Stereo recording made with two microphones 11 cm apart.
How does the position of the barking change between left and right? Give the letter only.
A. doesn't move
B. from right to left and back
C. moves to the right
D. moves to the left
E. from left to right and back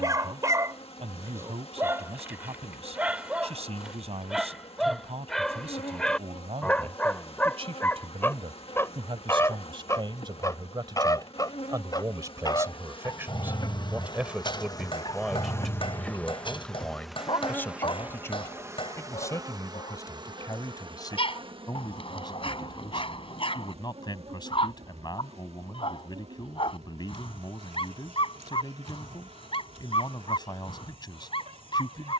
D.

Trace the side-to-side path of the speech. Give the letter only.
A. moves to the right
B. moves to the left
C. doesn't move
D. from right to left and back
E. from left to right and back
B.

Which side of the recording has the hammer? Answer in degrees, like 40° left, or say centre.
50° left.